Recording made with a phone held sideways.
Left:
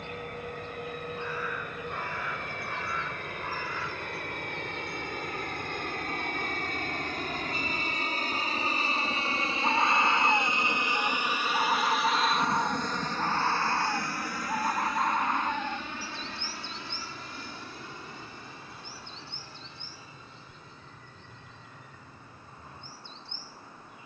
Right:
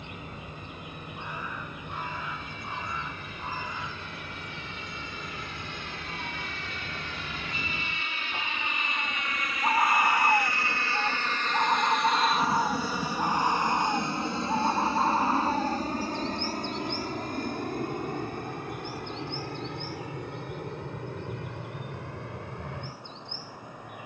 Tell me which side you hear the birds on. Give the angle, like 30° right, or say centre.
20° right.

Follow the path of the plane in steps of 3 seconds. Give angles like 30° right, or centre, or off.
70° left, 60° left, 50° left, 20° left, 10° right, 40° right, 50° right, 60° right.